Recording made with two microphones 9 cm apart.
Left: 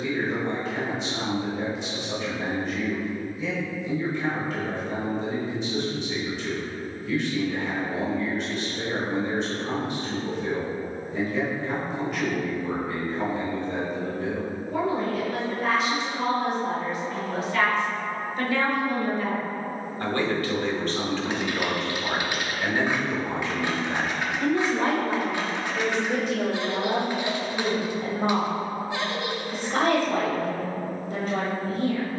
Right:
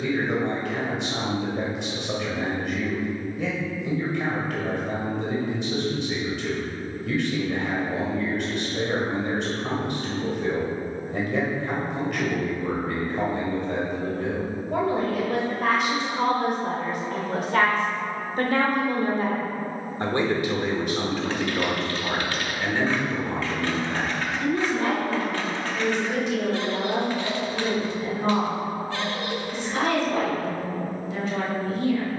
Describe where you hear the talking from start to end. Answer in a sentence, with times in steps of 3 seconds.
You can hear the talking on the right from 0 s, in the centre from 21 s and on the left from 24 s.